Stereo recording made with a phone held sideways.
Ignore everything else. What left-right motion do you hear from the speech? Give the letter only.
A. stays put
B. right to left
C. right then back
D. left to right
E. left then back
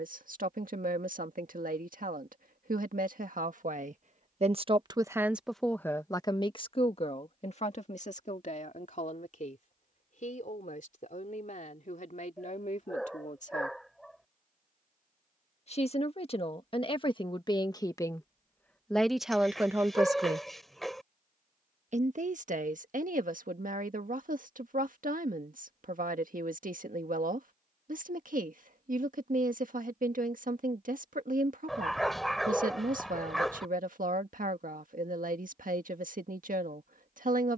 E.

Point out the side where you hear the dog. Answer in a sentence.
In this clip you hear the dog in the centre.